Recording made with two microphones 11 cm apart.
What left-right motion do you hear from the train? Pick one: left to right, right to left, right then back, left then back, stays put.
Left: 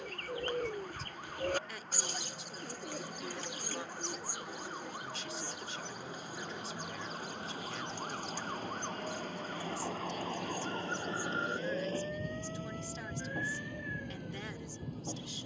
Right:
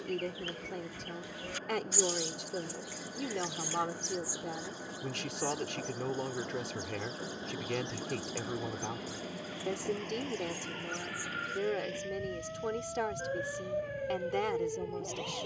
right to left.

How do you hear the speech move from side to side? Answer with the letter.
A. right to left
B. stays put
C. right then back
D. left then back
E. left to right
B.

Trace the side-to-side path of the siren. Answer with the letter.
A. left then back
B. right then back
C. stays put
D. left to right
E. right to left
D.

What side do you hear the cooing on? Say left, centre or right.
left.